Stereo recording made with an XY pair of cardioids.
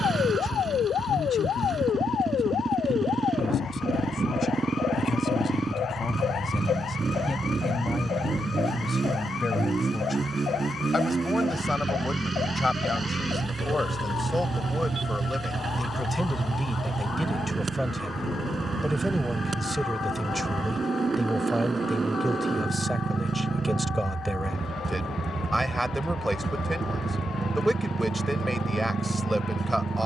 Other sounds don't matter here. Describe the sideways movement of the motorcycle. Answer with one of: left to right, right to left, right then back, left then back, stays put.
stays put.